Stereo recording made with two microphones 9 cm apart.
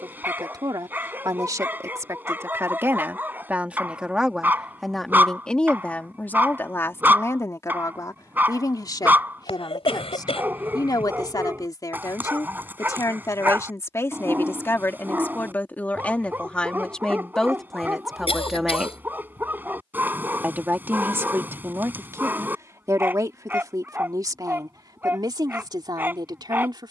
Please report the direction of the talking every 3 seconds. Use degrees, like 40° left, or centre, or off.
40° right, centre, 30° left, 40° left, 30° left, 10° left, 10° right, 30° right, 50° right.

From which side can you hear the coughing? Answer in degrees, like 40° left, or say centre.
80° left.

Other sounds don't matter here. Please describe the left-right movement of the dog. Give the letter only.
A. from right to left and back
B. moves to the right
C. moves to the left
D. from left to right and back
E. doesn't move
E.